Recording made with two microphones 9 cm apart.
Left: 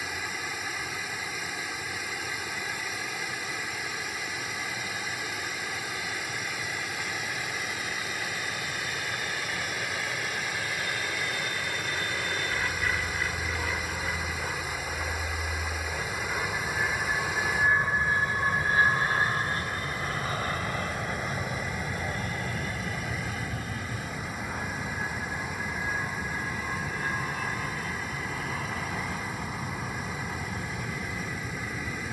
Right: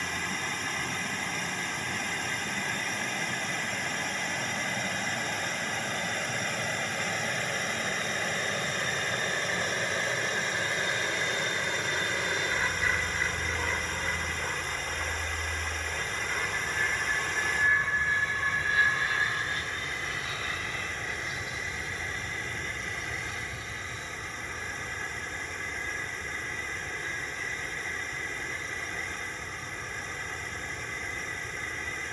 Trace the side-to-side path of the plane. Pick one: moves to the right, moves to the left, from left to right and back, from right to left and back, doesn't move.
moves to the left.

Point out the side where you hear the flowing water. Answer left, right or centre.
centre.